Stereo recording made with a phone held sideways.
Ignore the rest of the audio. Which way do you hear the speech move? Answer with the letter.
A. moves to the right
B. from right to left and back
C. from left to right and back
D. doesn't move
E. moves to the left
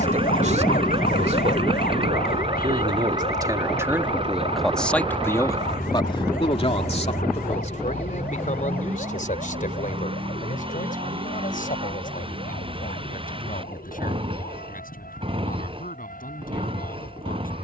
E.